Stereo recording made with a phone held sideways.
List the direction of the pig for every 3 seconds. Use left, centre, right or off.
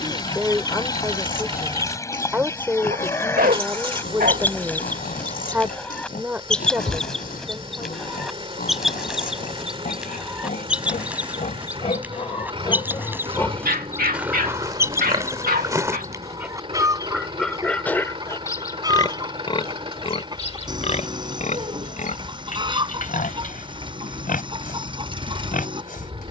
left, left, left, left, centre, centre, left, left, left.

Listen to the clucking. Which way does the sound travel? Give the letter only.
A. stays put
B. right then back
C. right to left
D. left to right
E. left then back
D.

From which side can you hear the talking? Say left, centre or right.
centre.